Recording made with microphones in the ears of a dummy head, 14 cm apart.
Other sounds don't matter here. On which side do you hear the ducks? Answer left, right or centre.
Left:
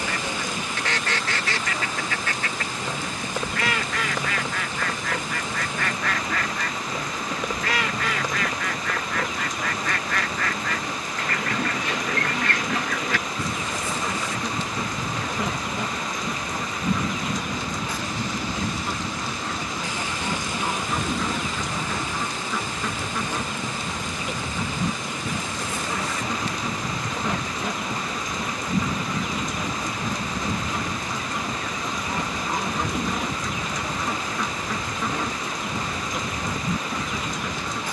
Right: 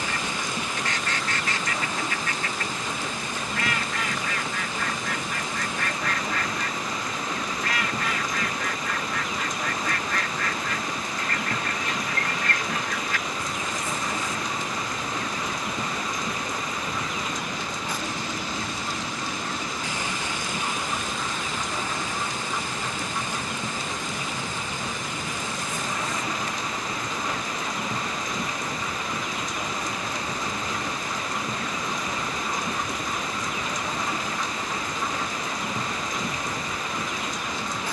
left.